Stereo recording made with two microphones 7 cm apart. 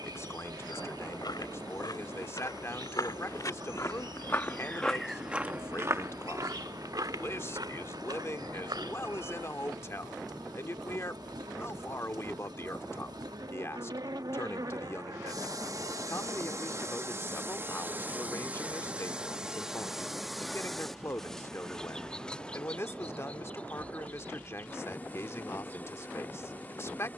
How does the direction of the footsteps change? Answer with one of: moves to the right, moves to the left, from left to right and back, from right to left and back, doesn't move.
moves to the right.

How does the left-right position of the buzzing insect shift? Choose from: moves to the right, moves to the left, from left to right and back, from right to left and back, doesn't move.
moves to the left.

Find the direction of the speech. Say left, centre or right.
left.